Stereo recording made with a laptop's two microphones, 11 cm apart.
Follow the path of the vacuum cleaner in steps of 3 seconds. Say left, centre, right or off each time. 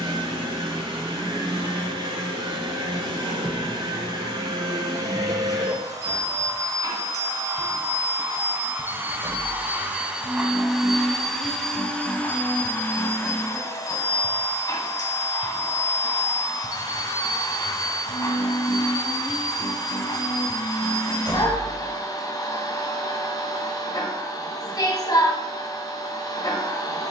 right, right, right, centre, left, left, left, left, left.